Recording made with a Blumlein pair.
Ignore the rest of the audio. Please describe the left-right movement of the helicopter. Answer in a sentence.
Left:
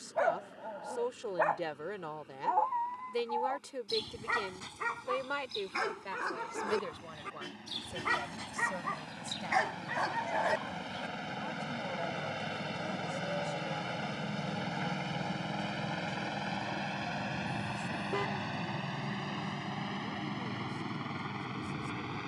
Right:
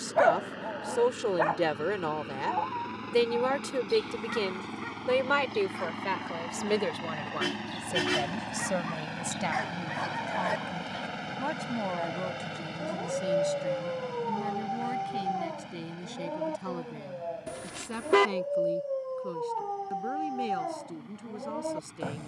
You can hear the helicopter move from right to left.